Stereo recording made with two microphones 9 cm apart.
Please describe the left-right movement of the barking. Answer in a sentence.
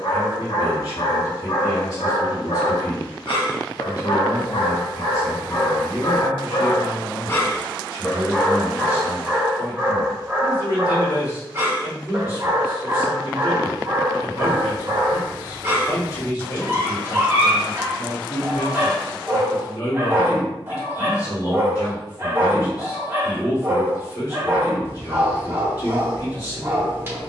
In this clip you hear the barking go from the left side to the right.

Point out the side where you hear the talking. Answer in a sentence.
You can hear the talking on the left.